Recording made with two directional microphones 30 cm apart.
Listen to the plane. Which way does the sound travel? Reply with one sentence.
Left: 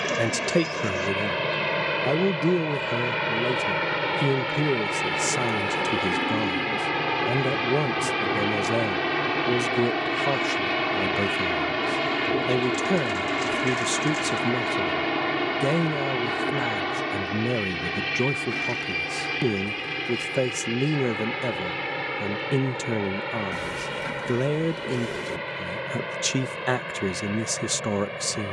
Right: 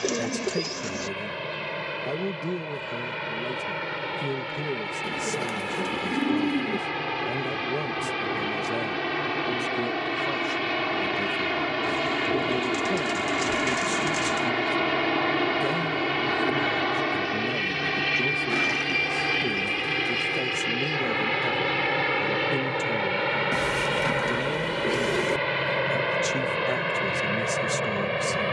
You can hear the plane move from left to right.